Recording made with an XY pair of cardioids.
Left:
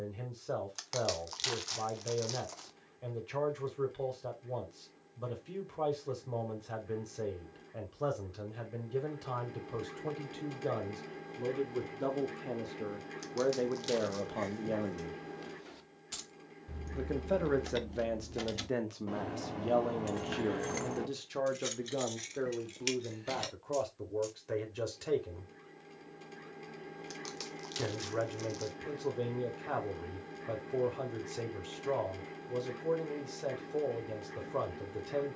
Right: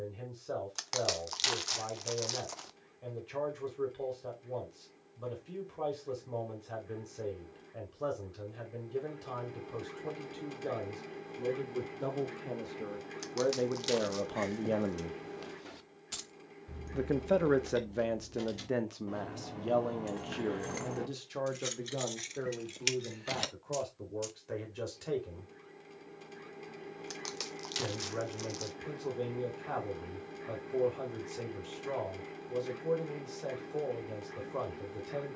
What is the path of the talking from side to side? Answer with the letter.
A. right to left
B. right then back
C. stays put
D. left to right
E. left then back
B.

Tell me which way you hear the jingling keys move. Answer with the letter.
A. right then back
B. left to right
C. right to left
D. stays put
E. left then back
E.